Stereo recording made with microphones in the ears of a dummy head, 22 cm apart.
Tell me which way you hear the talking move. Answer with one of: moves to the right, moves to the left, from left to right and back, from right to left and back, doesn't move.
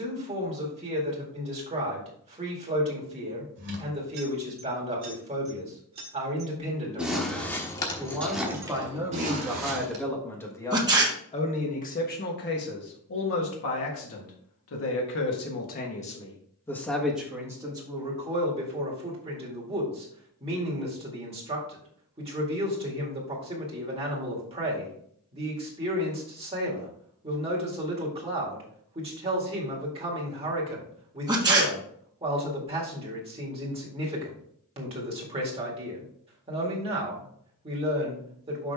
from right to left and back.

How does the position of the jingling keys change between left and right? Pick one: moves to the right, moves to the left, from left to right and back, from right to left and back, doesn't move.
from right to left and back.